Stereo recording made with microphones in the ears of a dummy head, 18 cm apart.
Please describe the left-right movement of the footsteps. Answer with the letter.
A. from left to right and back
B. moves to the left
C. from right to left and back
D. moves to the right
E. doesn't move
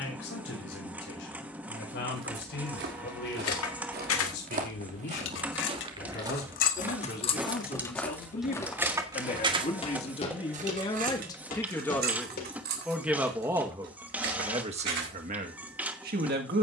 B.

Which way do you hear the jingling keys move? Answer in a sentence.
In this clip you hear the jingling keys move from left to right.